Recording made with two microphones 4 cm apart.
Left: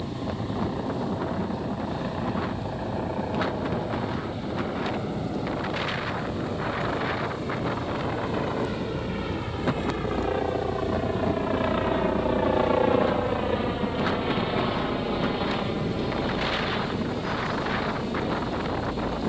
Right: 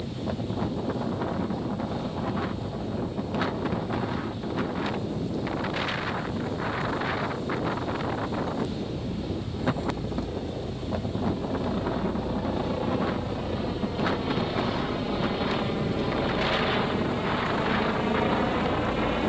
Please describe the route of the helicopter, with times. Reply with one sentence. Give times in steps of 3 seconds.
You can hear the helicopter on the left from 0 s, in the centre from 15 s and on the right from 18 s.